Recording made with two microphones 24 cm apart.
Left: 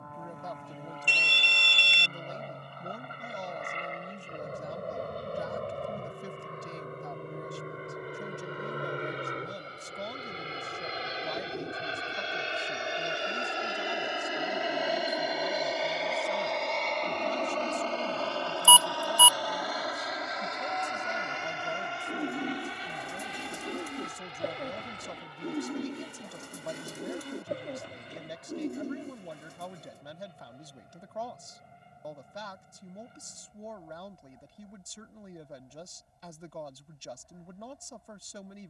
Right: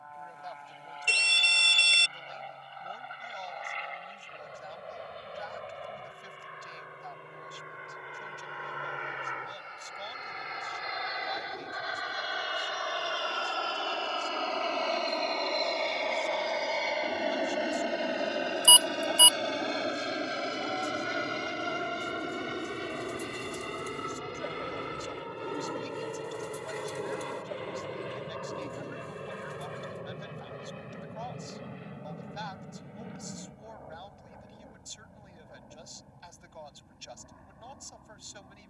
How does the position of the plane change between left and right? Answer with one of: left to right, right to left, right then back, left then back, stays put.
left to right.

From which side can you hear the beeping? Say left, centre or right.
right.